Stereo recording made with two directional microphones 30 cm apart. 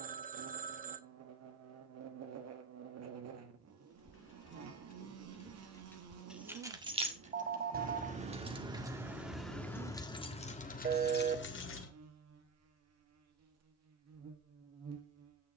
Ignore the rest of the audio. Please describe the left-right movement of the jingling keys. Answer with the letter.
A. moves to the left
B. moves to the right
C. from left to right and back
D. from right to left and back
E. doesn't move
C.